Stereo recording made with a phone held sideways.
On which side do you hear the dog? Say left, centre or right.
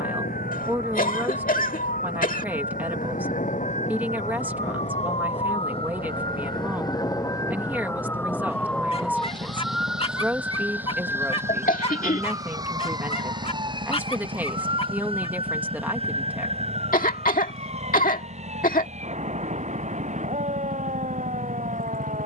left.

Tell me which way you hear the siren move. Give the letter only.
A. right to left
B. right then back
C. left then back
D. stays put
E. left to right
E.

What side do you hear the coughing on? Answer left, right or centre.
left.